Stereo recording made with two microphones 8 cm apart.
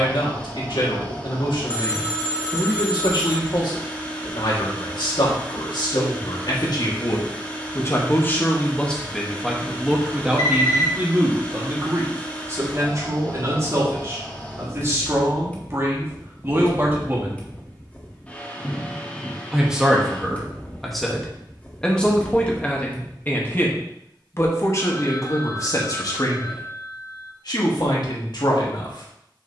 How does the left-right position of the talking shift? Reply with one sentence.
In this clip you hear the talking move from left to right and back again.